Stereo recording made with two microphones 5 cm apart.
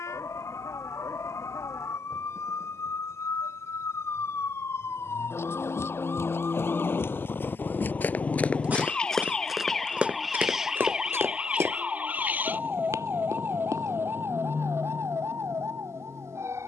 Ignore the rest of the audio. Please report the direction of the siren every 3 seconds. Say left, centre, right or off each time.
left, left, left, centre, right, right.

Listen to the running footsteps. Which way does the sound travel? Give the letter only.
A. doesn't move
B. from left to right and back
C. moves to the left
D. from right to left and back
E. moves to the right
E.